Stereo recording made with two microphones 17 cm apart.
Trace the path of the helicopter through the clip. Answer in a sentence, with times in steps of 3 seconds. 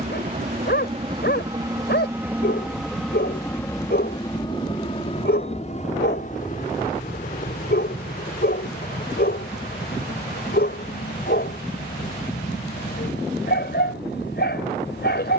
In this clip you hear the helicopter on the right from 0 s and on the left from 3 s.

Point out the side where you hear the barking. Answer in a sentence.
You can hear the barking on the left.